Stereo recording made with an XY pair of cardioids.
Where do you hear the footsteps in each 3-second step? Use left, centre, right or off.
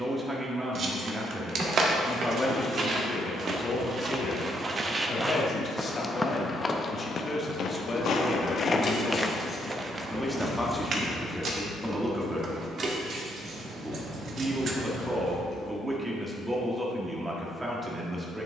right, right, left, right, off, off.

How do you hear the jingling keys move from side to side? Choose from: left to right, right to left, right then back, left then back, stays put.
left to right.